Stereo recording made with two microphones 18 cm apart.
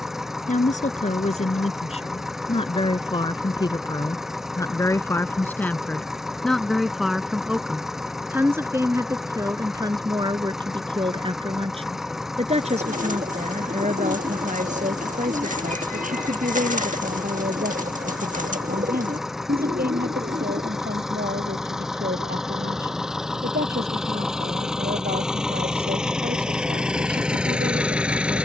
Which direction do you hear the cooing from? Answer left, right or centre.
right.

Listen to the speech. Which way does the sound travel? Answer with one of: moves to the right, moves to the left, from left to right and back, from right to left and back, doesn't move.
moves to the right.